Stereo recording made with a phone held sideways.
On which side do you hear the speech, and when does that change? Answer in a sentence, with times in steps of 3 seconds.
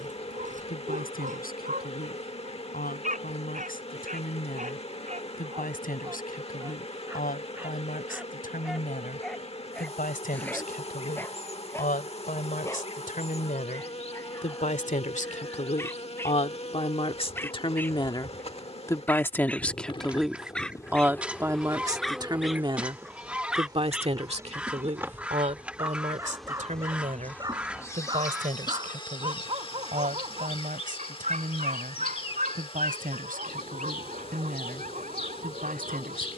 In this clip you hear the speech on the left from 0 s, in the centre from 18 s and on the right from 21 s.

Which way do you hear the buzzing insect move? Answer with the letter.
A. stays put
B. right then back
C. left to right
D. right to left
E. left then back
B.